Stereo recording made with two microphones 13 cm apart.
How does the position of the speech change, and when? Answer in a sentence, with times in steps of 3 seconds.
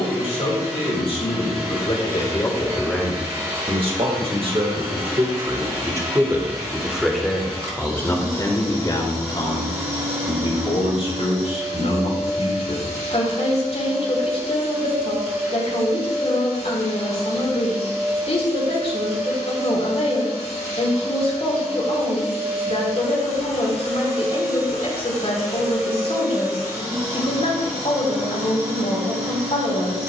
You can hear the speech on the left from 0 s, on the right from 3 s, in the centre from 6 s and on the left from 9 s.